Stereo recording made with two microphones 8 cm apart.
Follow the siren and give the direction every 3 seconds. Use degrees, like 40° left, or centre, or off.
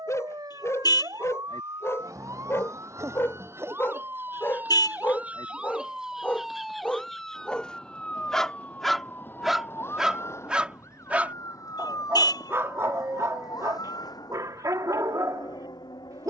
50° right, 20° right, 10° left, 30° left, 50° left, 60° left.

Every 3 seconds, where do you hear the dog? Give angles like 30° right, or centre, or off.
40° left, 30° left, 10° left, 10° right, 40° right, 50° right.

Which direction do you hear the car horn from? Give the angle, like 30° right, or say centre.
60° left.